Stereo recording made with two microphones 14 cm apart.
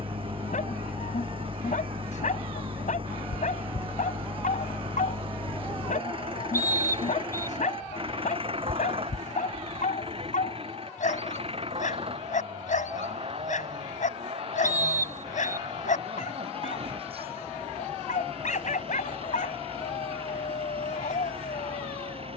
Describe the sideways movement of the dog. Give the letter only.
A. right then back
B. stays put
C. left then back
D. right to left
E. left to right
B.